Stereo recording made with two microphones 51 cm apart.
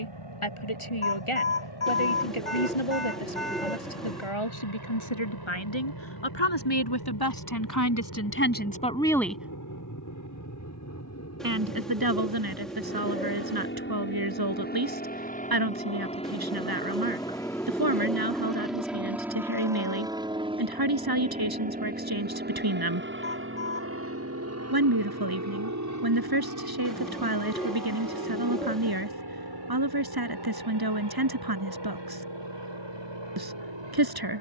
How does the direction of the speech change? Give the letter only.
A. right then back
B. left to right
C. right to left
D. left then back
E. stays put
B.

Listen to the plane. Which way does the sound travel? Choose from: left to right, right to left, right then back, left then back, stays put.
left to right.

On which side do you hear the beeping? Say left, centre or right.
left.